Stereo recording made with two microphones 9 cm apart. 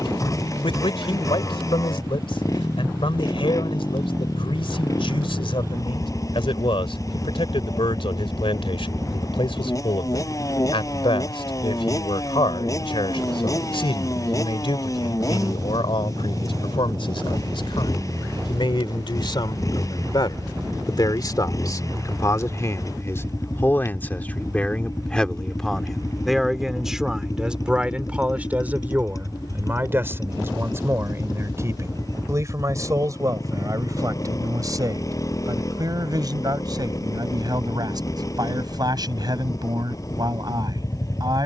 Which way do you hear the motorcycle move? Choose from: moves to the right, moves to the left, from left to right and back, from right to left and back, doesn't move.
doesn't move.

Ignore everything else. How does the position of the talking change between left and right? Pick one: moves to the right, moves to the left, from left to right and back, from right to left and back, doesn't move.
moves to the right.